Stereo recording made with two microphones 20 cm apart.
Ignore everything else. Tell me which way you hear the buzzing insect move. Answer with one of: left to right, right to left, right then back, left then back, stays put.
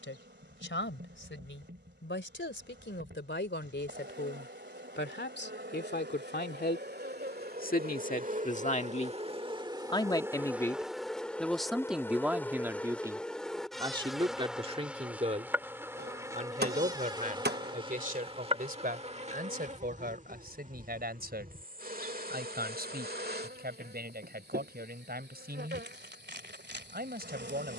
left then back.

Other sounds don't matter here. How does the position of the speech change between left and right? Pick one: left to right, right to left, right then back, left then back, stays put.
left to right.